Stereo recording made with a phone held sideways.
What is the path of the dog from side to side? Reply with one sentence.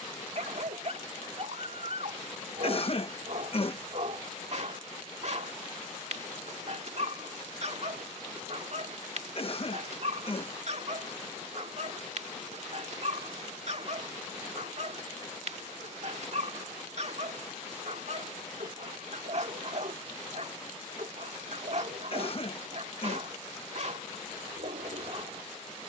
You can hear the dog stay in one place.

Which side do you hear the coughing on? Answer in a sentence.
In this clip you hear the coughing on the left.